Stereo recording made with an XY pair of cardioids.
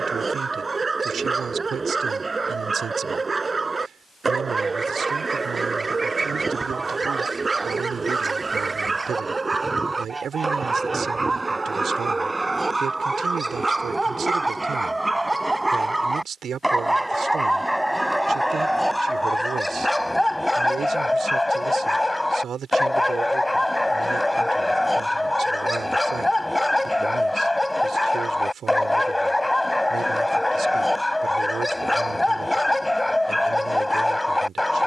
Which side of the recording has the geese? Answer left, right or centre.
right.